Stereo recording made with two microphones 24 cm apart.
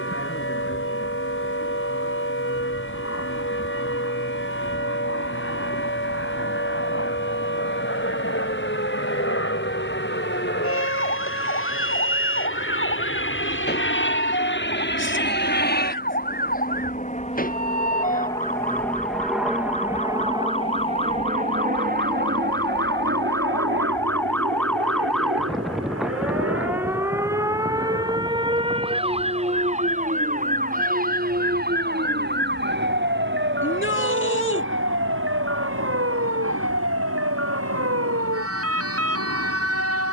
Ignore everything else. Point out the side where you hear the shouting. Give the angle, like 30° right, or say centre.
50° left.